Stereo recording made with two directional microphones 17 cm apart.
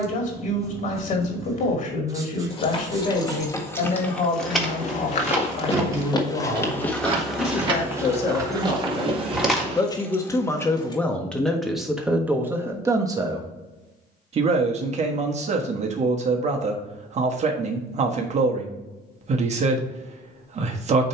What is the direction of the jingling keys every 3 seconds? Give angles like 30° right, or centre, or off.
30° left, centre, 30° right, 10° left, off, off, off.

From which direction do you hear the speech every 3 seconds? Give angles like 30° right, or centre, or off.
50° left, 50° left, 40° left, 10° left, 20° right, 40° right, 40° right.